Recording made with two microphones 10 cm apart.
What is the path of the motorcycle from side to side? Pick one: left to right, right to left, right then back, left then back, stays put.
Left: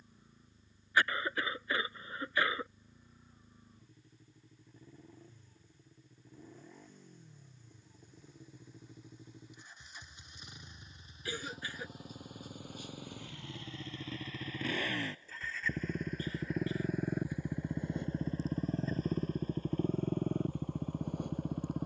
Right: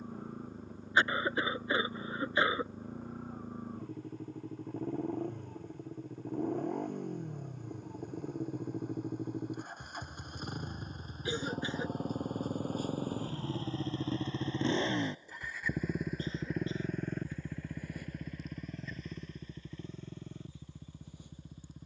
right to left.